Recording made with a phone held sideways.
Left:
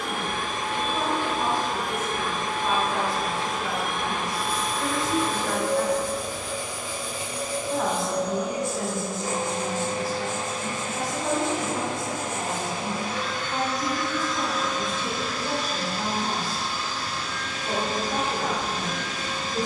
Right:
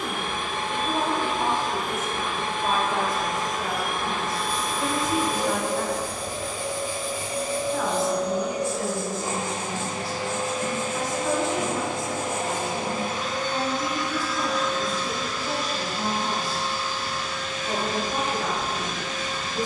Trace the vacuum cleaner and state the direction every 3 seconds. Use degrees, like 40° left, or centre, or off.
40° left, 10° left, 50° right, 70° right, 30° right, 30° left, 30° left.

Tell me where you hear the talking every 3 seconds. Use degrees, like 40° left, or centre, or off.
50° right, 20° right, 30° left, 50° left, 60° left, 60° left, 60° left.